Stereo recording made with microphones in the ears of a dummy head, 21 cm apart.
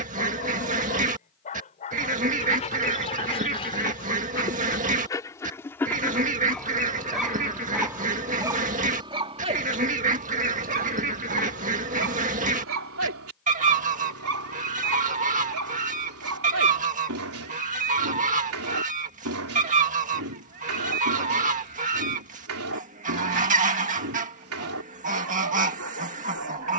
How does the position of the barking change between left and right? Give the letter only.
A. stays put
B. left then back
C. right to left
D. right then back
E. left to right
E.